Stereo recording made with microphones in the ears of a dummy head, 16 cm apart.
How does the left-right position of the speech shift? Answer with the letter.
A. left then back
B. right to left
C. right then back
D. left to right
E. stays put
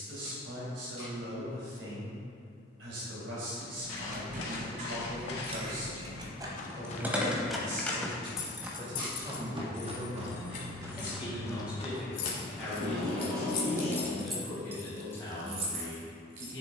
B.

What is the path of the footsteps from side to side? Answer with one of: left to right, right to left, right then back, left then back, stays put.
right then back.